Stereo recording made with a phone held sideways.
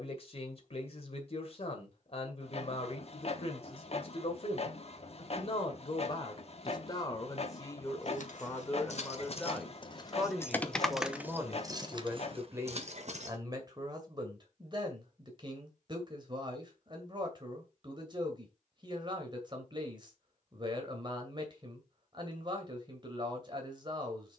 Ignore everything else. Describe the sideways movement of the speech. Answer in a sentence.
You can hear the speech move to the right.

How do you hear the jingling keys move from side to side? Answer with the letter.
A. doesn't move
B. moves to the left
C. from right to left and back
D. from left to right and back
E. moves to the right
E.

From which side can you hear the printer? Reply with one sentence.
In this clip you hear the printer on the left.